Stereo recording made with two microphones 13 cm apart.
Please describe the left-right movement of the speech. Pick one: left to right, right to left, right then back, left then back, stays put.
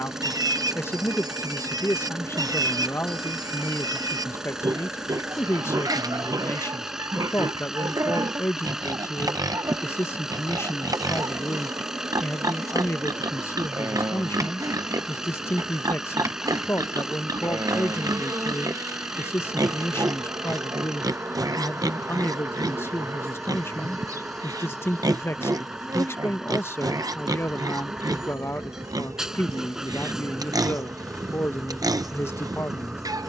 stays put.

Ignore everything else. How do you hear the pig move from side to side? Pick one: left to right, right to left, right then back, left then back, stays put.
stays put.